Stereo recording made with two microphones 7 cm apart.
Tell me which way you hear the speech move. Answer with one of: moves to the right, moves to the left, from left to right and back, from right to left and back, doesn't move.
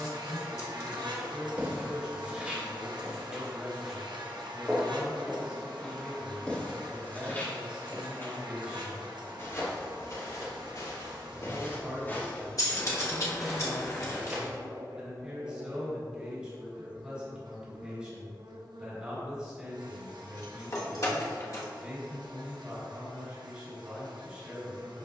doesn't move.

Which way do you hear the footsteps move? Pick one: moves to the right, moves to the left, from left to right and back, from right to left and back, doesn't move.
from right to left and back.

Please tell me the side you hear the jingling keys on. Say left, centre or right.
left.